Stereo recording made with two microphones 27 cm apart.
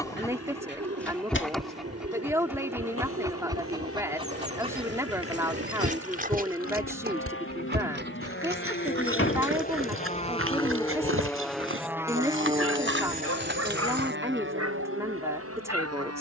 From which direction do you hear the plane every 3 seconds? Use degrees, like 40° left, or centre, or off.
80° left, 70° left, 50° left, 20° left, 30° right, 50° right.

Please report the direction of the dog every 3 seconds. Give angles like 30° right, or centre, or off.
centre, 20° right, 40° right, 50° right, 60° right, 60° right.